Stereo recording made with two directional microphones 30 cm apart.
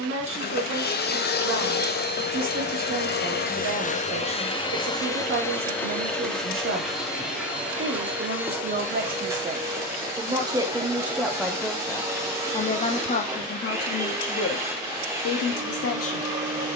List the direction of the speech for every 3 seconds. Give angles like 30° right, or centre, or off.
40° right, 40° right, 40° right, 10° right, 30° left, 50° left.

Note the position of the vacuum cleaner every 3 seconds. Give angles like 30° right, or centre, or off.
30° left, 20° left, centre, 10° right, 10° right, 10° right.